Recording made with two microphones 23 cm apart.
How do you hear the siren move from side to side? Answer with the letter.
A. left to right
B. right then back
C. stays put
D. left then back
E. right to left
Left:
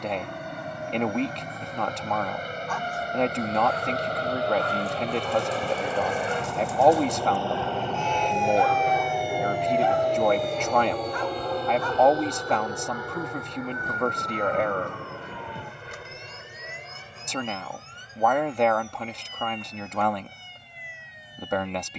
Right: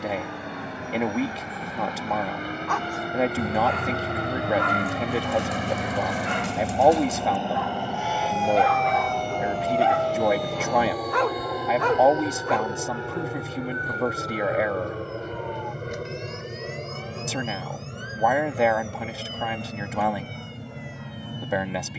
E.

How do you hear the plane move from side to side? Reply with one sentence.
In this clip you hear the plane move from left to right.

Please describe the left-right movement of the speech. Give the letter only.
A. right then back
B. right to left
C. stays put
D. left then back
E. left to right
C.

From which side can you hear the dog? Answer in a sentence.
You can hear the dog on the right.